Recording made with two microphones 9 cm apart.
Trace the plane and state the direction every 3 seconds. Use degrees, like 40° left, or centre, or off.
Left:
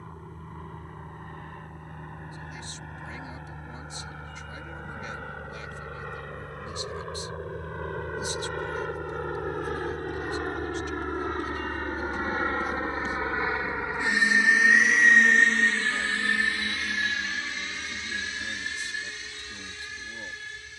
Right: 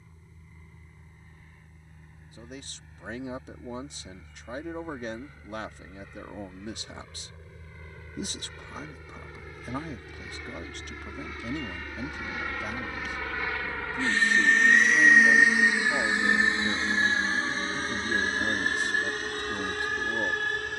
80° left, 80° left, 70° left, 60° left, 20° left, 20° right, 50° right.